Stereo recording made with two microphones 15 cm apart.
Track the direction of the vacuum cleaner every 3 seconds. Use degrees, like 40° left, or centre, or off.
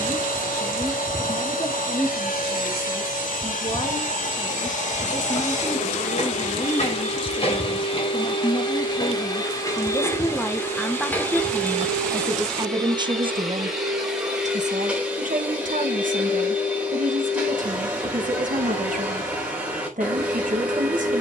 70° left, 60° left, 40° left, 20° left, centre, 10° right, 10° right.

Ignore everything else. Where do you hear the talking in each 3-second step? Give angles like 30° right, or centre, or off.
40° left, 40° left, 40° left, 10° left, 40° right, 70° right, 70° right.